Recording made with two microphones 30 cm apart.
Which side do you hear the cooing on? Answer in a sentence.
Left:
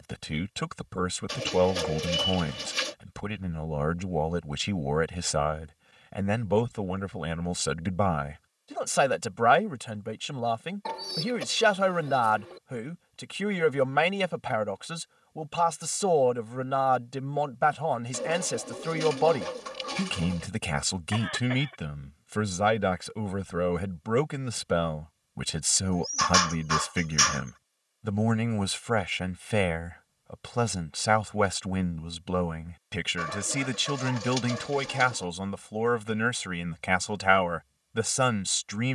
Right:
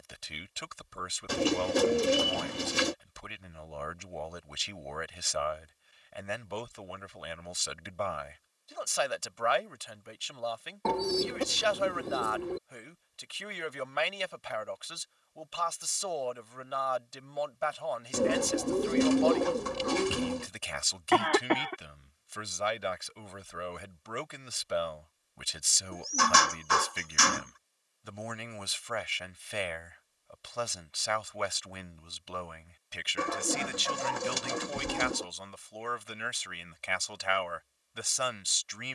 You can hear the cooing on the right.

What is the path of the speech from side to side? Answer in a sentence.
In this clip you hear the speech stay put.